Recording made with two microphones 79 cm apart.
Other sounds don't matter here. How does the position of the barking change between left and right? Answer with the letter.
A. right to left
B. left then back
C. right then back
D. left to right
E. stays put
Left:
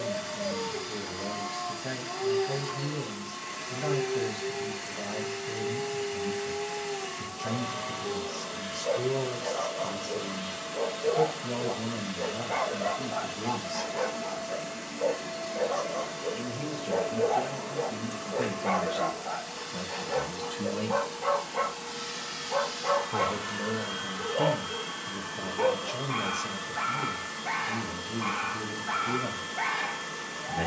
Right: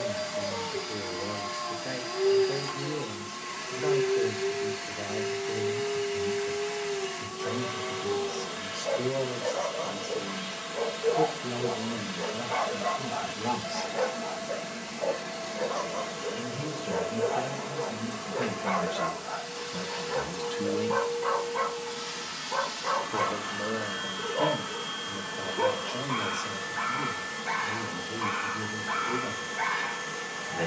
C.